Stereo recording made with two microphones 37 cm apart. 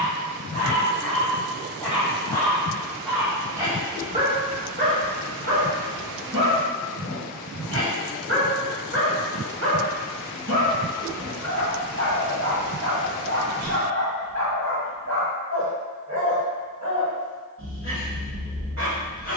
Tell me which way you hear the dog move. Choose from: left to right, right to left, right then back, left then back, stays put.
left to right.